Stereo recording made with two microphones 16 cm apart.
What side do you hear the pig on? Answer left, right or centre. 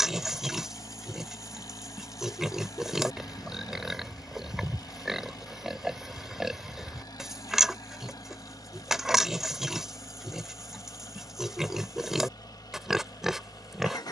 centre.